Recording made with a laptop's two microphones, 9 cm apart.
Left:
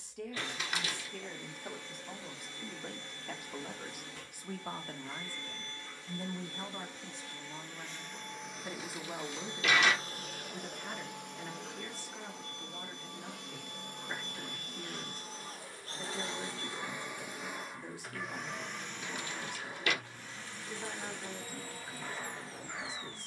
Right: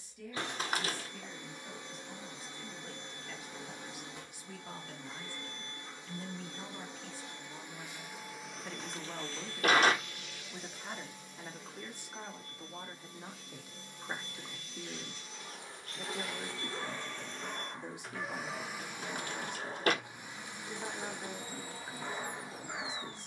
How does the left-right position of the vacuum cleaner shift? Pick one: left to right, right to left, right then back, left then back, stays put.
left then back.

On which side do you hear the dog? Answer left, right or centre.
right.